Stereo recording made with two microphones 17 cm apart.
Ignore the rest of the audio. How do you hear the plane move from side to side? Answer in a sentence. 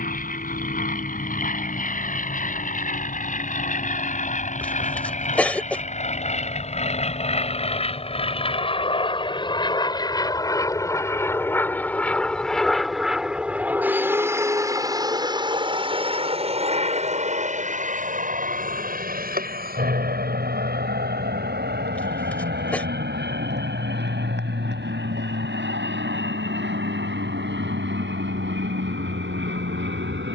In this clip you hear the plane move to the right.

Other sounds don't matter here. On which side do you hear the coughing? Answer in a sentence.
In this clip you hear the coughing in the centre.